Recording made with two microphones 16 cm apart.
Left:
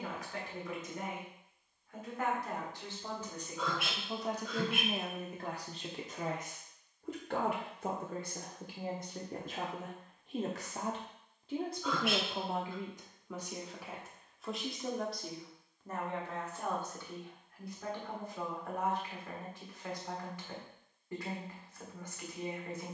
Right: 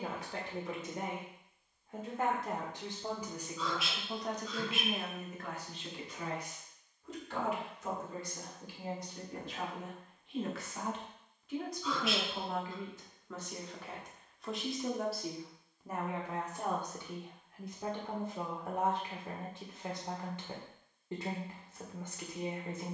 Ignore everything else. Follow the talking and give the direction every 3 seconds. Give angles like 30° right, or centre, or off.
30° right, 10° left, 50° left, 40° left, 10° left, 10° right, 30° right, 30° right.